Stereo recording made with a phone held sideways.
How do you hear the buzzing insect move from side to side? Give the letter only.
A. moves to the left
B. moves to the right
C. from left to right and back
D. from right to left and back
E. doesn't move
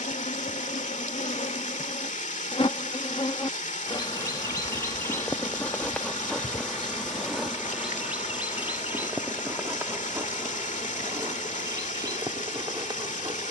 B.